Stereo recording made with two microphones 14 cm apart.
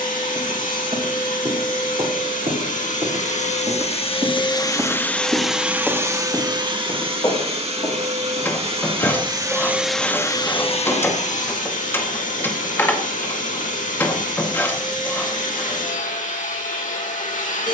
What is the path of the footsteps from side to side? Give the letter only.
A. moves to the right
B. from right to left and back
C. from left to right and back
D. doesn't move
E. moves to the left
E.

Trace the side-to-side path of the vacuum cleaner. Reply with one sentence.
You can hear the vacuum cleaner move from left to right and back again.